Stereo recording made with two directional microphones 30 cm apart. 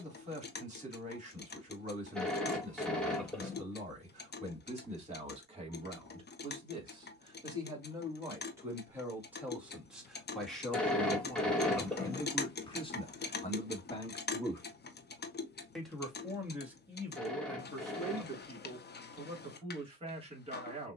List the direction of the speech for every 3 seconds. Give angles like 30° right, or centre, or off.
20° right, 20° right, 10° right, centre, 20° left, 10° right, 20° right.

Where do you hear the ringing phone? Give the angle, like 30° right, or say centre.
centre.